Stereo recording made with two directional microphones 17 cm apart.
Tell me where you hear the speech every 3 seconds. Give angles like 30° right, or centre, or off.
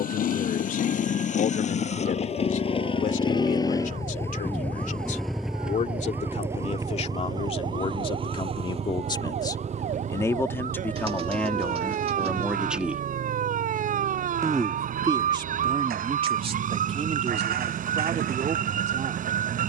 50° left, 50° left, 40° left, 10° left, 10° right, 30° right, 40° right.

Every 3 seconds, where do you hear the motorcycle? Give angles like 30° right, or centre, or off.
40° left, 10° left, 20° right, 40° right, 60° right, 60° right, 60° right.